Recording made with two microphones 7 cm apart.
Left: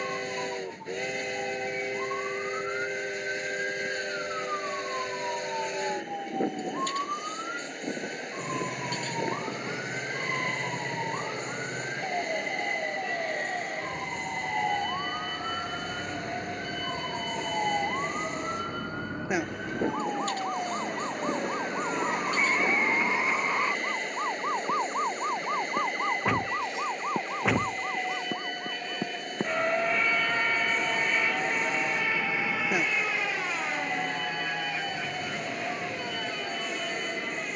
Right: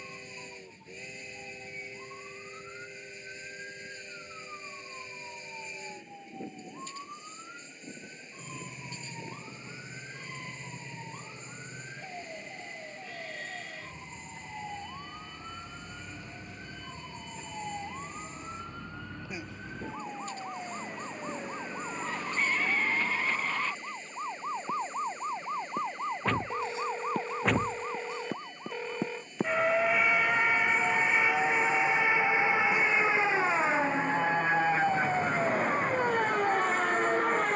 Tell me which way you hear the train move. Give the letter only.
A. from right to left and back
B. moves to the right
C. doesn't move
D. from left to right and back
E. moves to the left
C.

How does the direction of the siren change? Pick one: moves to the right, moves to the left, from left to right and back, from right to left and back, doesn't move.
moves to the right.